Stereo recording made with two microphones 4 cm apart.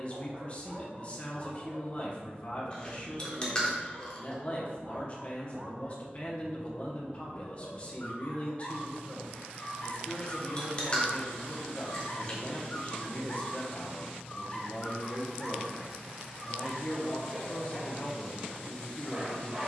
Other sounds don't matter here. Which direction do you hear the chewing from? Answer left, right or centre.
left.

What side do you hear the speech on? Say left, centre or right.
left.